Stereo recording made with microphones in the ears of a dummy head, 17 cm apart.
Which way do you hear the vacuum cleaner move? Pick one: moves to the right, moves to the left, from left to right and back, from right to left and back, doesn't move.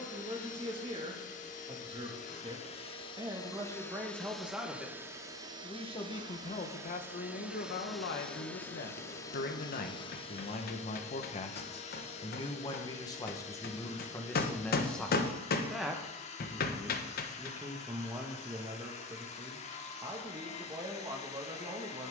from left to right and back.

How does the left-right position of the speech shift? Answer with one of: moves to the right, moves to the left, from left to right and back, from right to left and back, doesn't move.
from right to left and back.